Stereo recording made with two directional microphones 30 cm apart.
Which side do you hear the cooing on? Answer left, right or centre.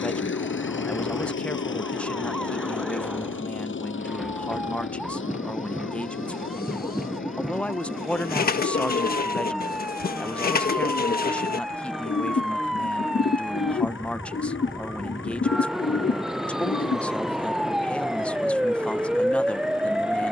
left.